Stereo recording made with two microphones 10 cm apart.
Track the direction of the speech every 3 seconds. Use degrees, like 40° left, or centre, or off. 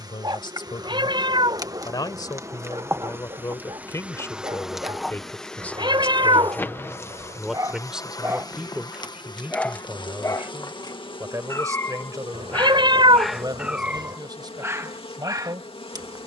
50° left, 30° left, centre, 30° right, 40° right, 50° right.